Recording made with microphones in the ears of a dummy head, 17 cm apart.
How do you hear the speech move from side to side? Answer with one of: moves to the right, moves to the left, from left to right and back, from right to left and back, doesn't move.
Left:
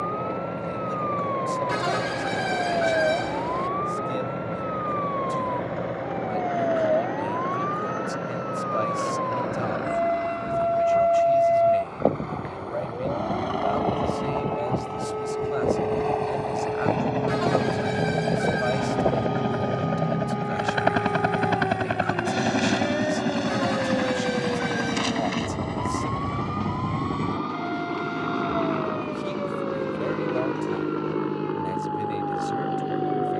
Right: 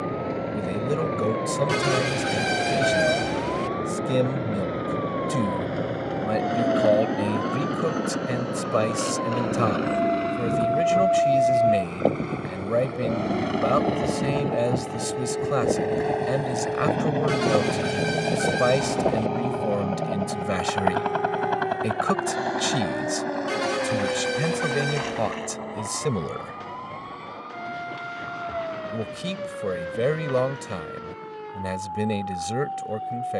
doesn't move.